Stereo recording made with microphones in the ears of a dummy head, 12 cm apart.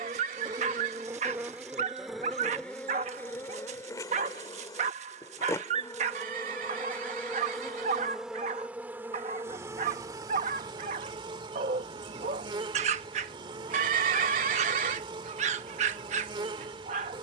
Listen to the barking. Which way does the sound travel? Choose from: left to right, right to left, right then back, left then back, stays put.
stays put.